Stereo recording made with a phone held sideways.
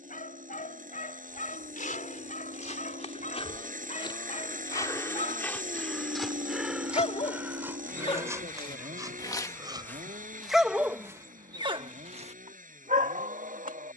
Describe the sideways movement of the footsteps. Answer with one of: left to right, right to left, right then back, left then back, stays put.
left to right.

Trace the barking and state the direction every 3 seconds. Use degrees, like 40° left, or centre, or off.
60° left, 60° left, 40° left, centre, 60° right.